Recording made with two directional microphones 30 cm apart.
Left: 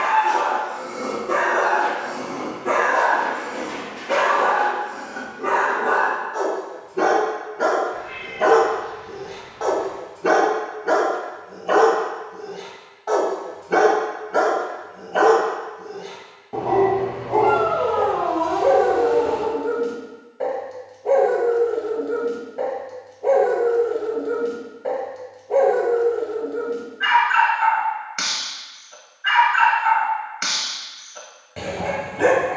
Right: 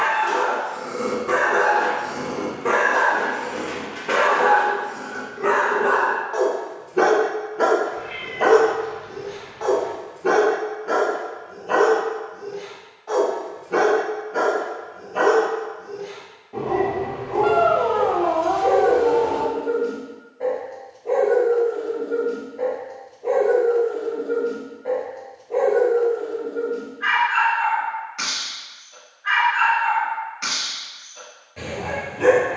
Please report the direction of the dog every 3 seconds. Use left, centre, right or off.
right, right, right, left, left, left, left, left, left, left, left.